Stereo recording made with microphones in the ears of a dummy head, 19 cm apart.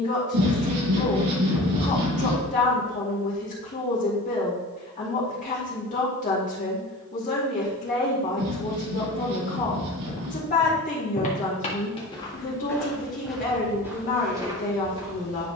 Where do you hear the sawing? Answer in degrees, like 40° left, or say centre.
70° right.